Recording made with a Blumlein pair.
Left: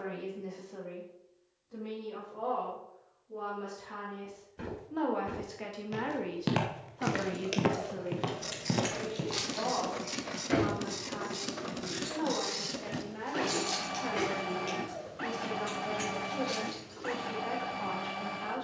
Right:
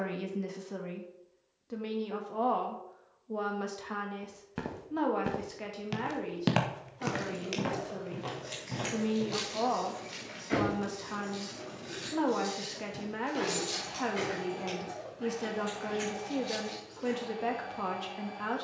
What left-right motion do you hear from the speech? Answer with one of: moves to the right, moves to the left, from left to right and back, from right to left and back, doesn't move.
from right to left and back.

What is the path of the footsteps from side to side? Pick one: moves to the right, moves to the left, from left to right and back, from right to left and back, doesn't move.
moves to the left.